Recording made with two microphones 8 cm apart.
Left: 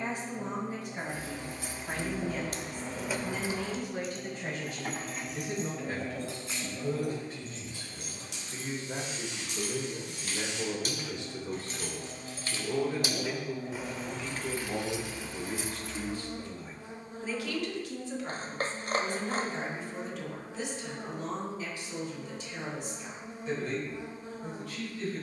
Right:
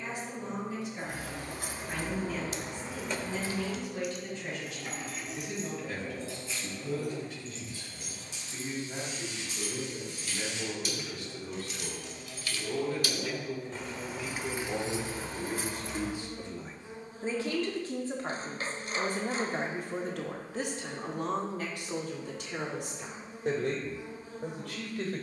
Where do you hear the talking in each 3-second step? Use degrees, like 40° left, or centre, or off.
50° left, 40° left, 40° left, 30° left, 10° left, 20° right, 50° right, 70° right, 80° right.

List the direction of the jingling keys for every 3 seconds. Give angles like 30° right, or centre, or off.
50° right, 40° left, 60° left, 50° left, 10° left, 50° right, off, off, off.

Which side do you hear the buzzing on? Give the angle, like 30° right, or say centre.
80° left.